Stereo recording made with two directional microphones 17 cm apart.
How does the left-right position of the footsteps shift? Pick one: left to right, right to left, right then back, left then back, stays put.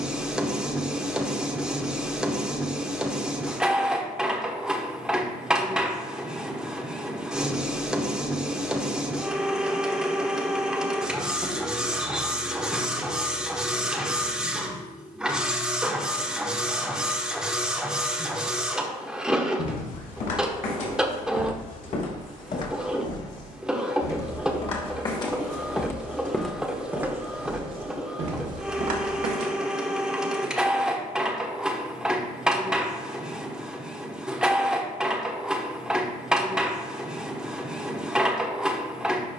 left to right.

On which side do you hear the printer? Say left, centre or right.
centre.